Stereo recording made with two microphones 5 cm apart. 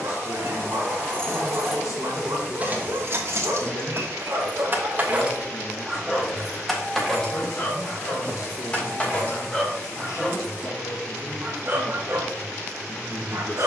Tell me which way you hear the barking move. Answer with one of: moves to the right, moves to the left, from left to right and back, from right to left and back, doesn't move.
from right to left and back.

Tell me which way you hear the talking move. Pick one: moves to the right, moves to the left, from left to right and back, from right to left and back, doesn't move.
doesn't move.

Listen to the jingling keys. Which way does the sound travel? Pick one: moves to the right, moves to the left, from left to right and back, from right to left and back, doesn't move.
from left to right and back.